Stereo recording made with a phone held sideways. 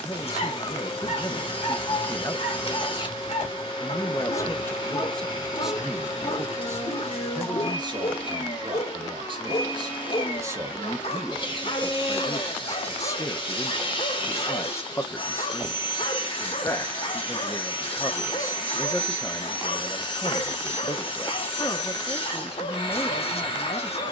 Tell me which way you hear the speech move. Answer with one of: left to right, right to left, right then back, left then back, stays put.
right then back.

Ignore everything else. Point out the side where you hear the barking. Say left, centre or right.
left.